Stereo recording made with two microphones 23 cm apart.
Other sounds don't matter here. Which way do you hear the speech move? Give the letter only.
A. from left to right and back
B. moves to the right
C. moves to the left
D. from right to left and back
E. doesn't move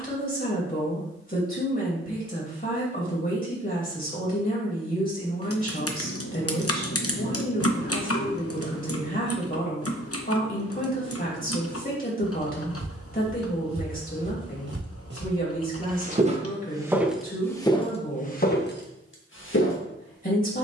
E.